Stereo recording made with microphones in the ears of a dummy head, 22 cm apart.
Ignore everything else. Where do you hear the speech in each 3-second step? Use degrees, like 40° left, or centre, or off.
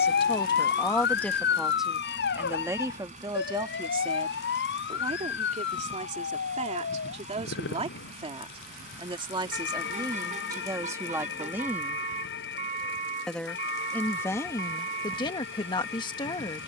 centre, 20° right, 30° right, 10° right, 10° left, 20° left.